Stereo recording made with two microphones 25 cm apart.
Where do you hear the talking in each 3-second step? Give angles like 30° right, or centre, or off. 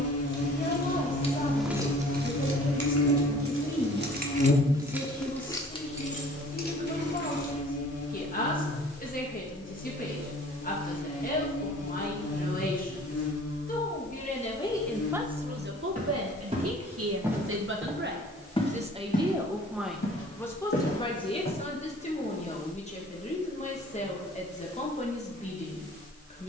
30° left, 30° left, 30° left, 30° left, 30° left, 50° right, 10° right, 20° left, 30° left.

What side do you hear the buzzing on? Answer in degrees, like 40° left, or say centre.
70° left.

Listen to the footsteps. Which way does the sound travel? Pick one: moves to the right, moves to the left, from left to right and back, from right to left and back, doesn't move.
moves to the left.